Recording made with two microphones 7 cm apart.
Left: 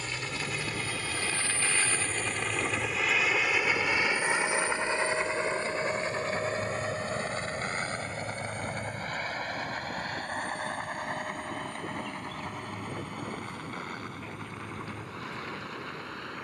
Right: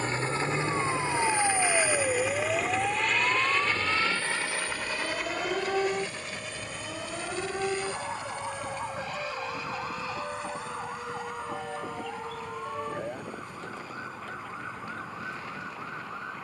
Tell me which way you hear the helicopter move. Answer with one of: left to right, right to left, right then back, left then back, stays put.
right to left.